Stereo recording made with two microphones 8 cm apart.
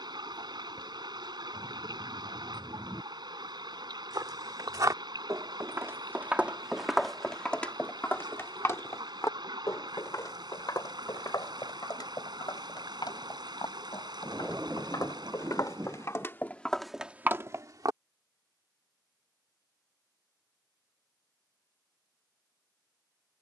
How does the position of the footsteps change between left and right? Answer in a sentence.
You can hear the footsteps go left and come back.